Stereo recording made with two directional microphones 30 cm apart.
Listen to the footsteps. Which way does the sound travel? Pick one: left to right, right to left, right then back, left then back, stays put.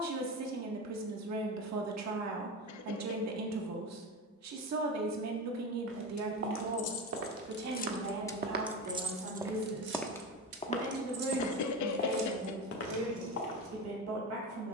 right to left.